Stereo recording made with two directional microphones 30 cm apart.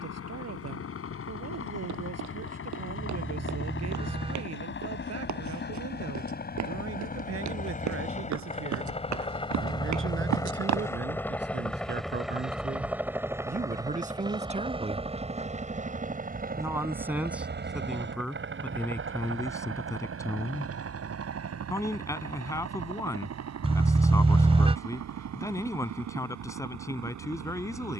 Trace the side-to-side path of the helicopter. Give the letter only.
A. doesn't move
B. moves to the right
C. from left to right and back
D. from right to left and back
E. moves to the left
B.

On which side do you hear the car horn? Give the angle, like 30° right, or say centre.
20° right.